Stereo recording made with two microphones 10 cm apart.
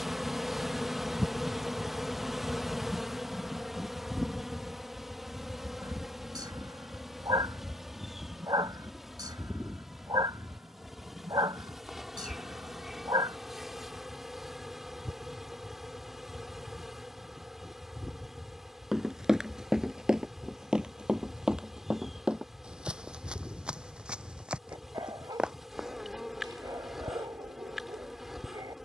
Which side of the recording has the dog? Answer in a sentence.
In this clip you hear the dog on the right.